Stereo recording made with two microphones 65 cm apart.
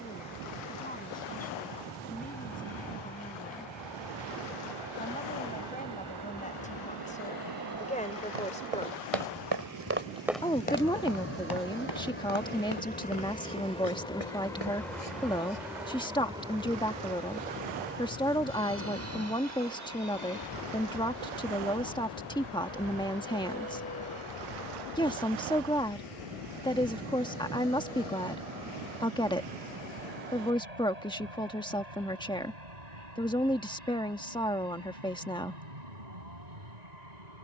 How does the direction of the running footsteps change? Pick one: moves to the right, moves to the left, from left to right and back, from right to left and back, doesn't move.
moves to the left.